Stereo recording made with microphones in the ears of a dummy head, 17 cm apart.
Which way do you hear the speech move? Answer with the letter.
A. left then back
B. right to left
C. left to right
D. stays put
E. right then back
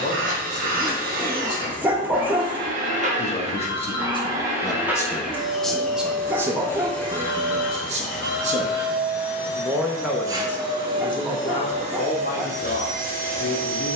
E.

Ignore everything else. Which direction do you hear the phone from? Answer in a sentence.
You can hear the phone on the left.